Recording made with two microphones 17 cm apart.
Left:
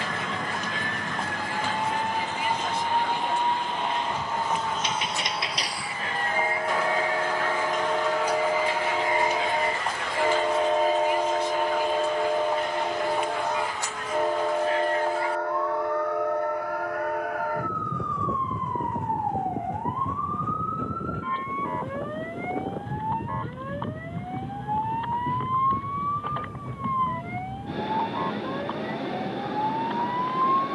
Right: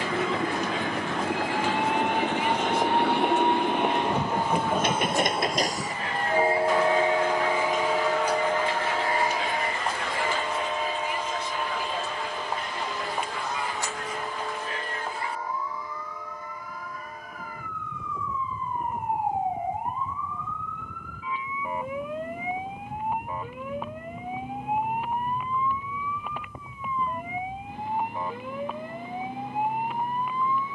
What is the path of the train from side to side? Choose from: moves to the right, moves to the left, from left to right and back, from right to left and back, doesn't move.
moves to the left.